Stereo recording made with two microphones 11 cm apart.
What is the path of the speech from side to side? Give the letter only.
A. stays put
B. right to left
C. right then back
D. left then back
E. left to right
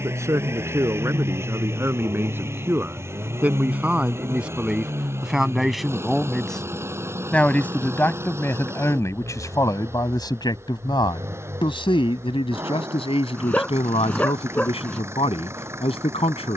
B.